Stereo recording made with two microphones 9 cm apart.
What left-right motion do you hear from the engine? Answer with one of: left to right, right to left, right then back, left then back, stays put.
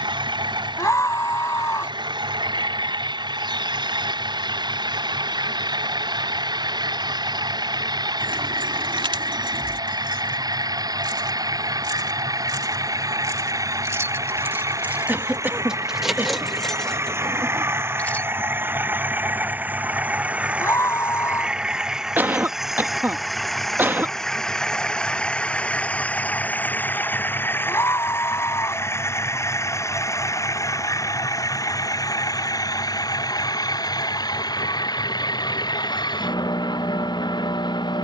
right to left.